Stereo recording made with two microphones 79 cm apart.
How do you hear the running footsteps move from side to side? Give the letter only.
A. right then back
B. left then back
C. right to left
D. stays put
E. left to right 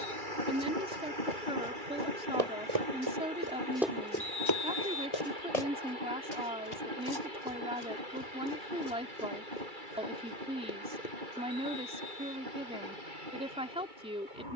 C.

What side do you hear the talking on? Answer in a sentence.
You can hear the talking in the centre.